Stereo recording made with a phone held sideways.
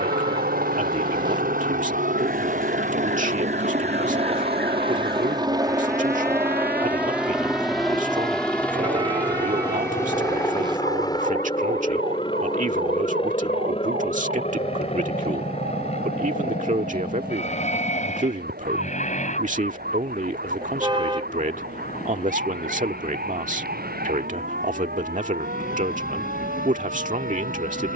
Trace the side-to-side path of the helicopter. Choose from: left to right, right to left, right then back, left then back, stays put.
right to left.